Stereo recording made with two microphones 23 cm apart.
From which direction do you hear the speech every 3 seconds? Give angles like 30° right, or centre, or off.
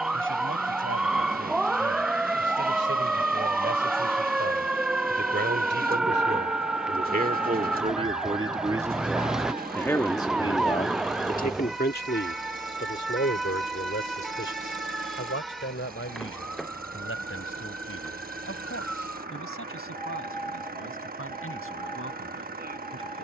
70° right, 60° right, 30° right, 30° left, 60° left, 70° left, 80° left, 80° left.